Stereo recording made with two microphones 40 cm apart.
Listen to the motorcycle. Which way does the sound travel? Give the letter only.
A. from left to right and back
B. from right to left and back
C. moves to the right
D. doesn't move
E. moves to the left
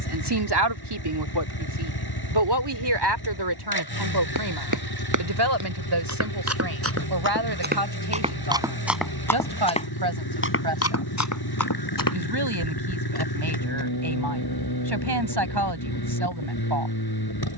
D.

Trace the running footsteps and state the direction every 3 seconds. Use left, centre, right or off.
off, right, right, left, left, off.